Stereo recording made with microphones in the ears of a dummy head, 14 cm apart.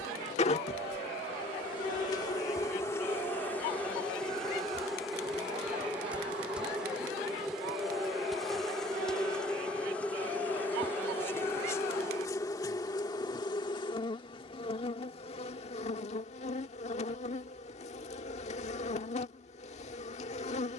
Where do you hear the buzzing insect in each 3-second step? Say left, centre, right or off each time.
left, centre, centre, centre, left, left, left.